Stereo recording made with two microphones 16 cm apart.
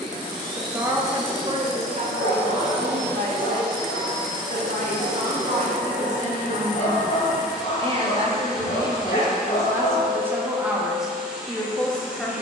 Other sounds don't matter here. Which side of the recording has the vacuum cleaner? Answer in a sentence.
You can hear the vacuum cleaner in the centre.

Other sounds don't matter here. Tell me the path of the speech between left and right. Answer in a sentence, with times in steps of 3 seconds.
You can hear the speech on the right from 0 s and in the centre from 9 s.